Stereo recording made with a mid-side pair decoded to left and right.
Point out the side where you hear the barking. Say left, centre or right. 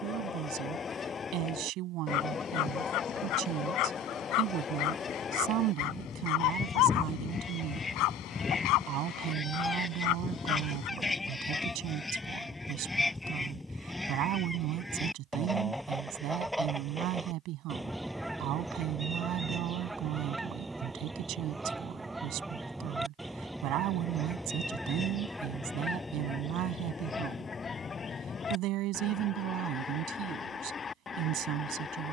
left.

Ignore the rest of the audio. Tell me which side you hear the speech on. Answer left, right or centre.
right.